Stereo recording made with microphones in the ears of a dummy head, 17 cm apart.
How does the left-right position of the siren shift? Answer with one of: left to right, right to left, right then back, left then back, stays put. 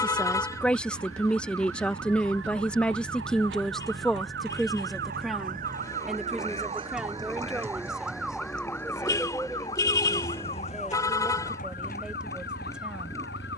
right to left.